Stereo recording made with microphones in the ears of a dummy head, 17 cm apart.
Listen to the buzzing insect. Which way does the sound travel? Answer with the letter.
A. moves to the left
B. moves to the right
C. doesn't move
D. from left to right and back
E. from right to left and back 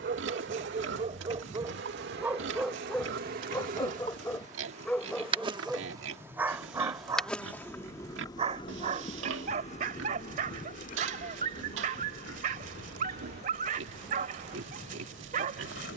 A.